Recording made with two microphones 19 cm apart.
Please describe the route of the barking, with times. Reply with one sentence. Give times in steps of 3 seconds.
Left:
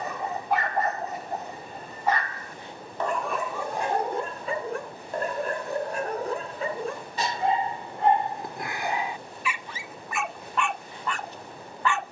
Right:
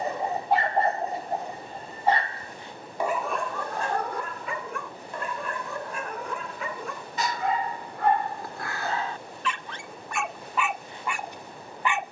You can hear the barking on the right from 0 s, on the left from 3 s and in the centre from 9 s.